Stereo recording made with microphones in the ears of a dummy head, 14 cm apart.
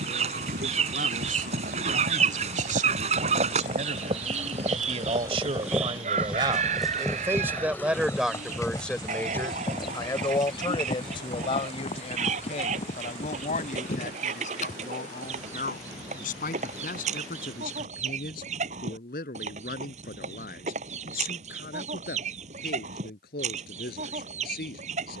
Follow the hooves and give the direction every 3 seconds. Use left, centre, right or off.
right, right, centre, left, left, off, off, off, off.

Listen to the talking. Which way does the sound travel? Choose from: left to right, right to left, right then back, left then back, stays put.
right to left.